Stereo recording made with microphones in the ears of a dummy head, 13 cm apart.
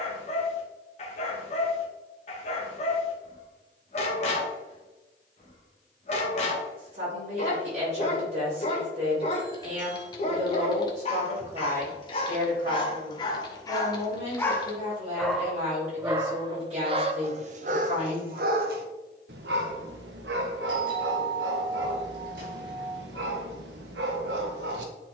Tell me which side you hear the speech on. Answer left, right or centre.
right.